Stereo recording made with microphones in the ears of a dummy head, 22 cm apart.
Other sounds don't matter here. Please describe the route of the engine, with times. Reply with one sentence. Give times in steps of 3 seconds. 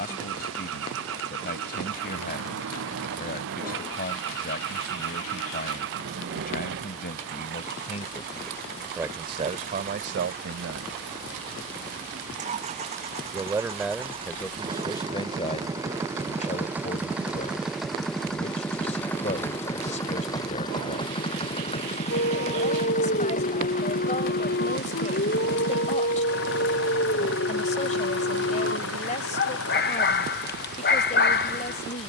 You can hear the engine on the right from 0 s, in the centre from 15 s and on the left from 21 s.